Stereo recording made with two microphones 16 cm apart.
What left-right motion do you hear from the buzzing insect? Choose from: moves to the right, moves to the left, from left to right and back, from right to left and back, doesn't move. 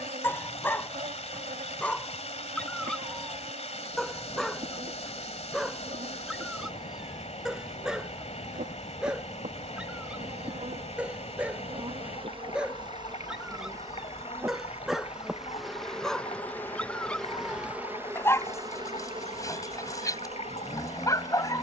from right to left and back.